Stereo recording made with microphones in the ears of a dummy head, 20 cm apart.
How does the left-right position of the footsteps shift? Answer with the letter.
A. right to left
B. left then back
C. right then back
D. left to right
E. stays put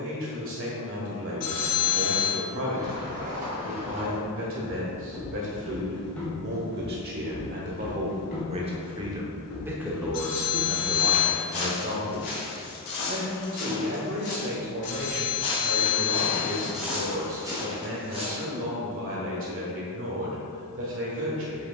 B.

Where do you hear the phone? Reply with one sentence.
You can hear the phone on the left.